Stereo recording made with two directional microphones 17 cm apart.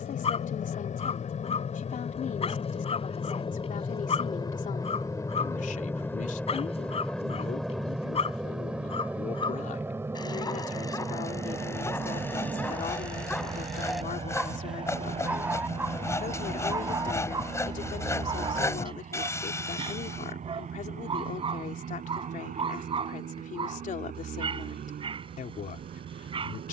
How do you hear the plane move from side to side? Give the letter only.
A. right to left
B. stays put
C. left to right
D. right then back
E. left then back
C.